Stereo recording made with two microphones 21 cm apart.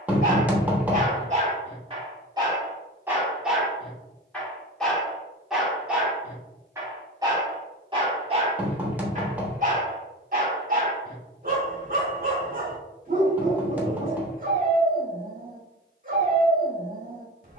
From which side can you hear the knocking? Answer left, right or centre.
centre.